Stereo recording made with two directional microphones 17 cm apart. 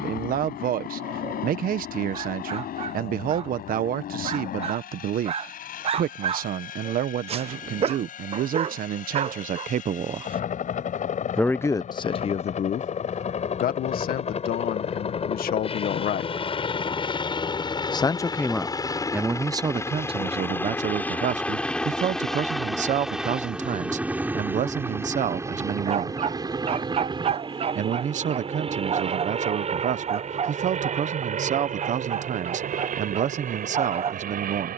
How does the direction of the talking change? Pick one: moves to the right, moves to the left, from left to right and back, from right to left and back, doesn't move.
from right to left and back.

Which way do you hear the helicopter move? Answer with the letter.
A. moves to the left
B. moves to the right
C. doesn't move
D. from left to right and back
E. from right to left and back
B.